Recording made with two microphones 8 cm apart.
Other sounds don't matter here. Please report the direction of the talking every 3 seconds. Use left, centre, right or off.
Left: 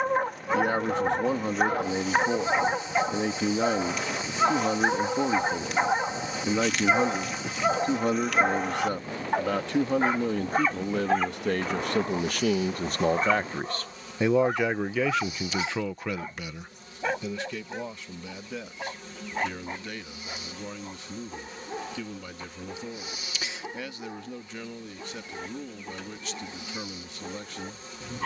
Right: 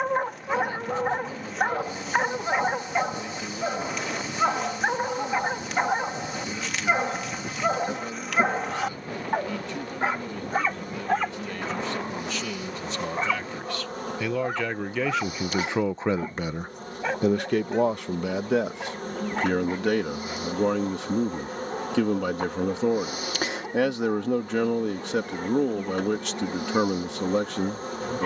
left, left, left, left, left, right, right, right, right, right.